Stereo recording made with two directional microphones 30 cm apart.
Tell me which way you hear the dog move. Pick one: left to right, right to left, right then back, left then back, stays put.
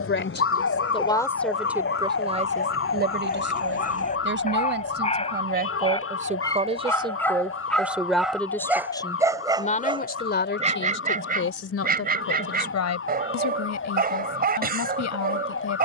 left to right.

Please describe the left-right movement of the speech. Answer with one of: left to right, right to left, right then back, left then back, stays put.
right then back.